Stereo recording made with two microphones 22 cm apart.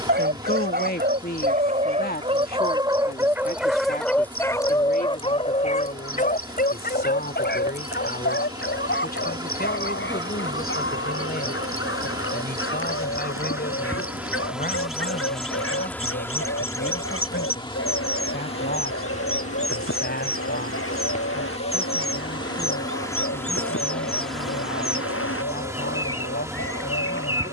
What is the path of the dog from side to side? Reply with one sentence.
You can hear the dog move to the left.